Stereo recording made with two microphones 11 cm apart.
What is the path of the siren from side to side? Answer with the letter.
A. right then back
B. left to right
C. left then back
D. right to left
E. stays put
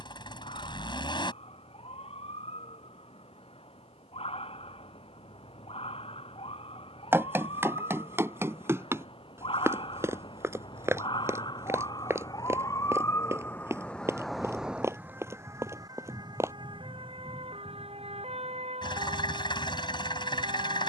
B.